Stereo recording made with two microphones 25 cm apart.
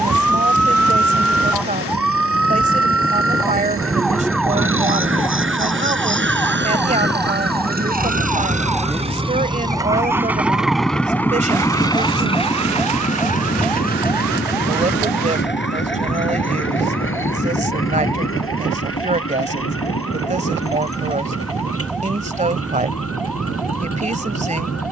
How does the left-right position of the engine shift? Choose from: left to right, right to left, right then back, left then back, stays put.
right to left.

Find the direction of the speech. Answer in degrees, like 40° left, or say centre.
30° right.